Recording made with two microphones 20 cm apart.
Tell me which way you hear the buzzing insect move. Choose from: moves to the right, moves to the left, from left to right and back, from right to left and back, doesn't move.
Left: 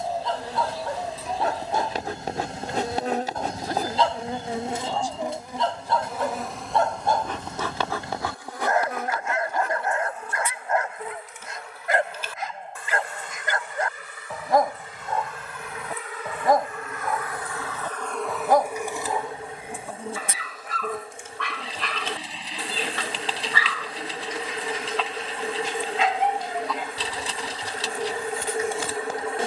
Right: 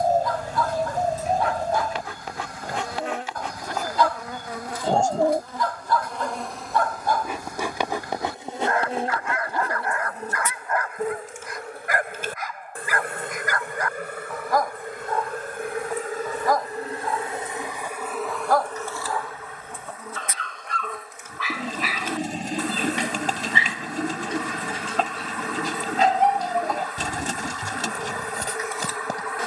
from left to right and back.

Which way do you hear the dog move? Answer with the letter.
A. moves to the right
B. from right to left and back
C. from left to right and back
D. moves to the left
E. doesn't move
A.